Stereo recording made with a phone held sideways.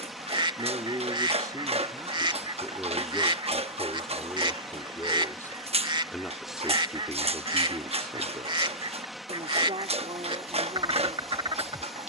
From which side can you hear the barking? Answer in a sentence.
You can hear the barking on the right.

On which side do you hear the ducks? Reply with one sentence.
You can hear the ducks on the right.